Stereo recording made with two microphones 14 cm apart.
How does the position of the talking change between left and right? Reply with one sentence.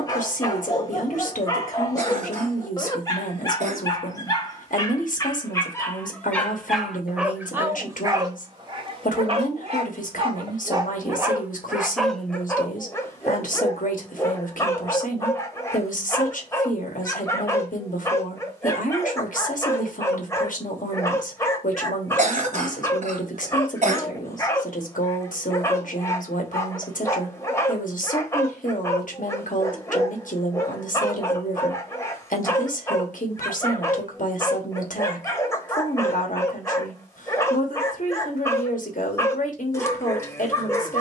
You can hear the talking stay put.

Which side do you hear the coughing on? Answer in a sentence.
You can hear the coughing on the right.